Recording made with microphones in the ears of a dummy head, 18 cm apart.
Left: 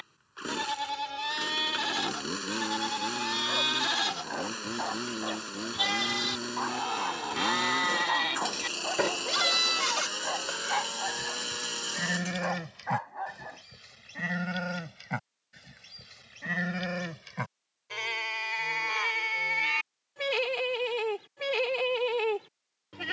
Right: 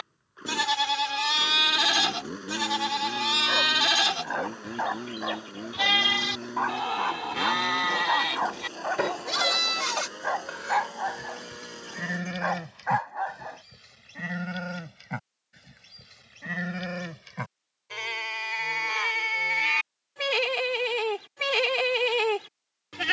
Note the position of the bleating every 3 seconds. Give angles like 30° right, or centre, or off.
60° right, 40° right, 20° right, centre, 10° left, 10° left, 20° right, 60° right.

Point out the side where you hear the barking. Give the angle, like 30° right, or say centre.
50° right.